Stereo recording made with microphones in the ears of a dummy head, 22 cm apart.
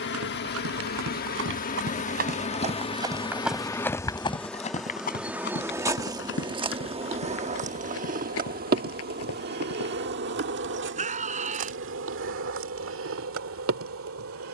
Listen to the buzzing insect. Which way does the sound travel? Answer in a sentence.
In this clip you hear the buzzing insect go from the left side to the right.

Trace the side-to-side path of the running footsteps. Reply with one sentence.
You can hear the running footsteps move from right to left.